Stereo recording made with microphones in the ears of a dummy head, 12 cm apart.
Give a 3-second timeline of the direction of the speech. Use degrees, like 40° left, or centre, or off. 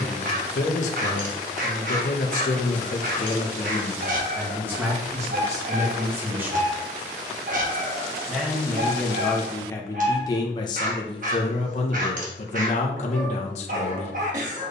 60° left, centre, centre, 30° left, 50° left.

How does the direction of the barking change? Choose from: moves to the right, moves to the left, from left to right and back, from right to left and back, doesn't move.
doesn't move.